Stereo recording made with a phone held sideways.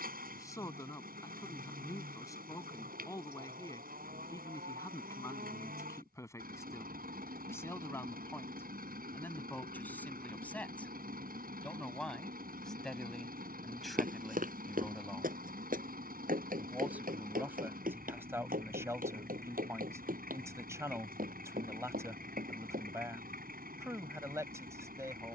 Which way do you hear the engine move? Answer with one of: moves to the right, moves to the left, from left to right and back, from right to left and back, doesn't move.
doesn't move.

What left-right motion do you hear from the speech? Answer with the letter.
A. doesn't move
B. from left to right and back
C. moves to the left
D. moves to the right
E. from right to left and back
D.